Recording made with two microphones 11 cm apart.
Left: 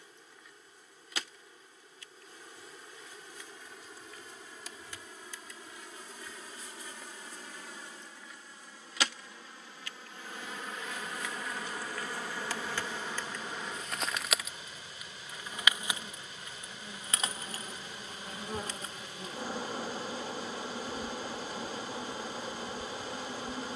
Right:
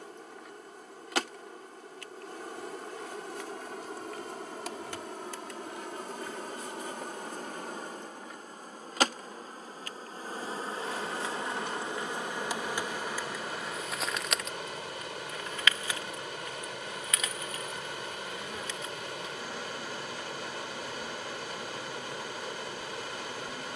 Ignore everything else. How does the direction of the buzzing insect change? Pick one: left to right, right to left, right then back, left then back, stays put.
right to left.